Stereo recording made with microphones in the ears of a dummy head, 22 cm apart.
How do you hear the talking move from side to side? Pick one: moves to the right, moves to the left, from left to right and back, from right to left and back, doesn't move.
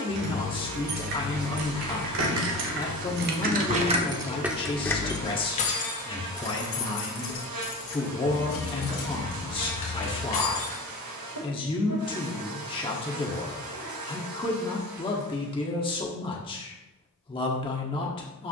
doesn't move.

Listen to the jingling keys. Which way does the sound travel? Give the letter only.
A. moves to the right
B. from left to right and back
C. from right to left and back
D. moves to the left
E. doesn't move
D.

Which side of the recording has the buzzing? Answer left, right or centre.
right.